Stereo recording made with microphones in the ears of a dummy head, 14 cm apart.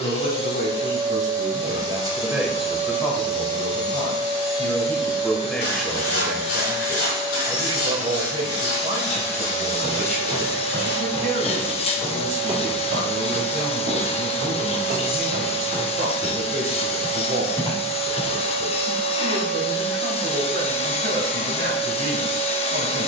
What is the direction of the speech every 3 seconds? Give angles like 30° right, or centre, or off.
30° right, 10° left, 20° right, 50° right, 50° right, 50° right, 50° right, 50° right.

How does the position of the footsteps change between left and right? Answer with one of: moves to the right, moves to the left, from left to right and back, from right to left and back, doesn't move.
from left to right and back.